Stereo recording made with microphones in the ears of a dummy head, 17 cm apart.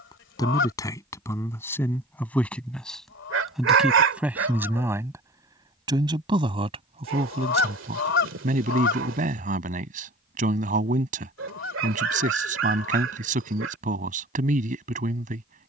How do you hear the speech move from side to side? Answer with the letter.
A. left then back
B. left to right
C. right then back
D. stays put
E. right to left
B.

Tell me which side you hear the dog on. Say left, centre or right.
right.